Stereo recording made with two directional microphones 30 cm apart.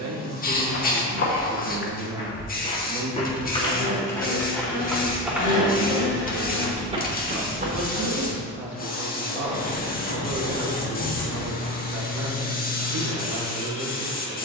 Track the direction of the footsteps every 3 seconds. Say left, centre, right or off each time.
left, centre, right, off, off.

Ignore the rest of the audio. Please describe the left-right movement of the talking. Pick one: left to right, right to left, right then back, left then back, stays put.
stays put.